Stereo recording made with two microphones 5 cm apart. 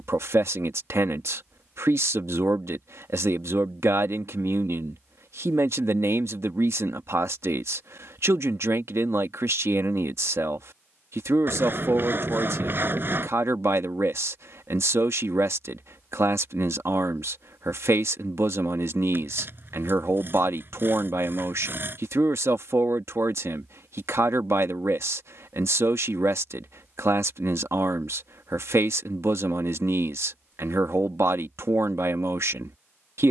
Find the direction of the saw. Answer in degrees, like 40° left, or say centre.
50° right.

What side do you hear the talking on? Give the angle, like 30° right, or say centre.
70° right.